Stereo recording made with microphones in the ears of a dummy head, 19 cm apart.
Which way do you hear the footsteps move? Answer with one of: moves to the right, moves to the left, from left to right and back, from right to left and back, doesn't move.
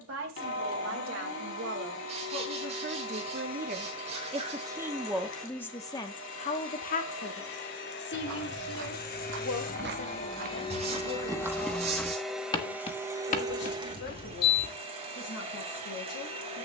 moves to the left.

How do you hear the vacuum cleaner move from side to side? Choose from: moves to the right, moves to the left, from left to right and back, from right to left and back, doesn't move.
moves to the right.